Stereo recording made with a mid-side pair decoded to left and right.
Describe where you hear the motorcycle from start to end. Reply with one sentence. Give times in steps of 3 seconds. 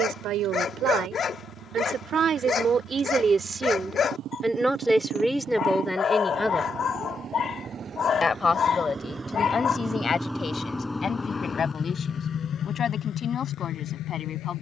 You can hear the motorcycle on the right from 0 s, in the centre from 9 s and on the left from 12 s.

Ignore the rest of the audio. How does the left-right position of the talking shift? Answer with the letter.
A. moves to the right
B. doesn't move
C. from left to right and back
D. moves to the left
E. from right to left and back
D.